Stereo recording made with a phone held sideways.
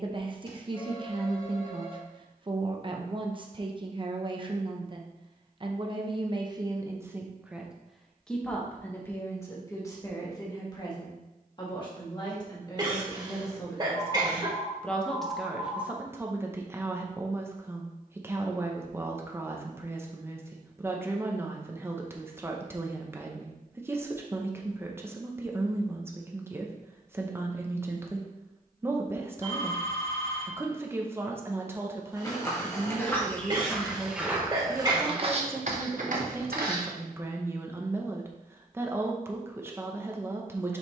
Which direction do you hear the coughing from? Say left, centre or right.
right.